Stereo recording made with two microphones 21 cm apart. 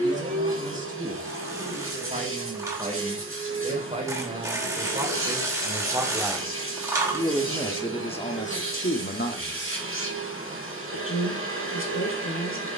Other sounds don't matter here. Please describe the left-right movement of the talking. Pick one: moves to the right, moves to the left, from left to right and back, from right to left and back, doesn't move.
moves to the left.